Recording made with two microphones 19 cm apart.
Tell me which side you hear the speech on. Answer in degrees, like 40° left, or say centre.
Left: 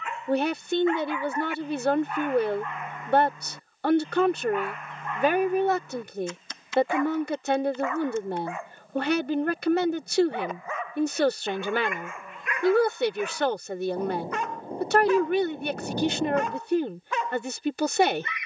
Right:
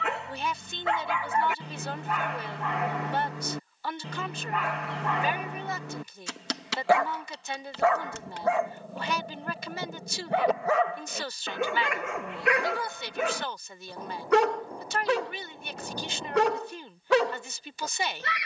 60° left.